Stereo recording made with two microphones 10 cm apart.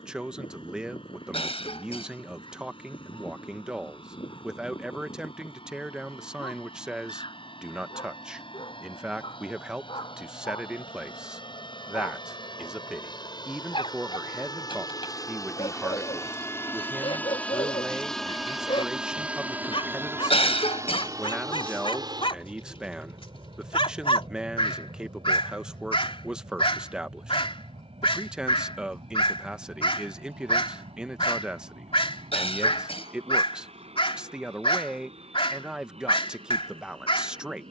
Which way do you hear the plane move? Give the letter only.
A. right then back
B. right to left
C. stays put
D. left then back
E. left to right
E.